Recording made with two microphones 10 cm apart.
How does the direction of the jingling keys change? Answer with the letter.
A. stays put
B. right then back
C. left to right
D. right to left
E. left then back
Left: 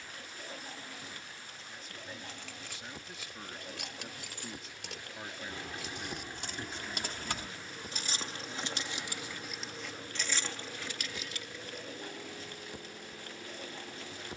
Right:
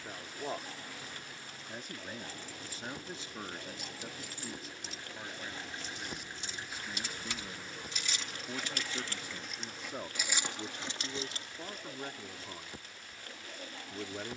C.